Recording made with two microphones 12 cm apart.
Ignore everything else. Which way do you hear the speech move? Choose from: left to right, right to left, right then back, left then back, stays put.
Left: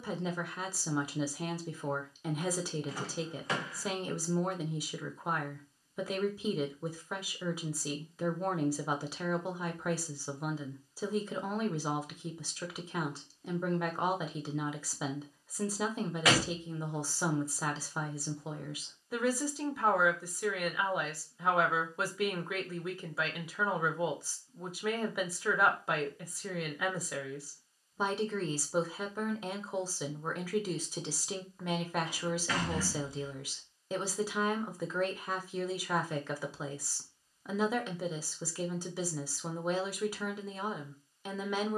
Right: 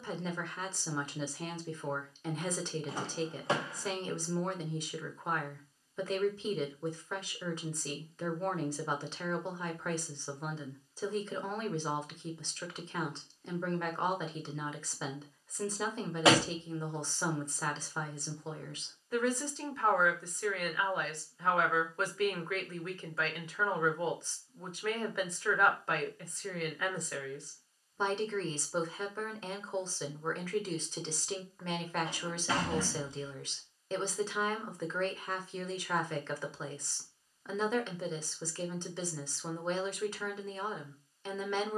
stays put.